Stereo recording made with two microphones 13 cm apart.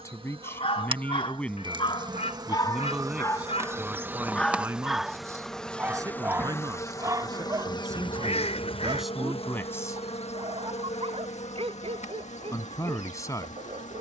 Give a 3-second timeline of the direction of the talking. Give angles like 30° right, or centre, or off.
10° left, 20° right, 30° right, 10° left, 30° left.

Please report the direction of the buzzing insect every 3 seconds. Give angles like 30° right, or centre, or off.
40° right, 10° right, 30° left, 60° left, 70° left.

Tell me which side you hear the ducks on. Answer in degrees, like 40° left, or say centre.
60° left.